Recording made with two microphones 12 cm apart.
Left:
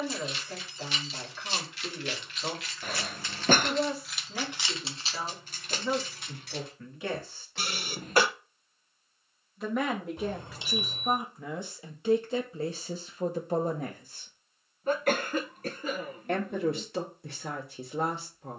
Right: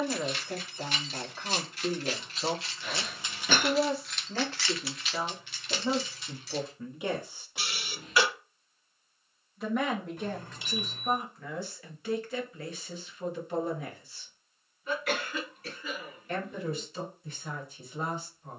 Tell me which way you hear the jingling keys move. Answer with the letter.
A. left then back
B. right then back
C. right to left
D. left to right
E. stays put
C.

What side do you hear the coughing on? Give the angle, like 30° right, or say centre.
50° left.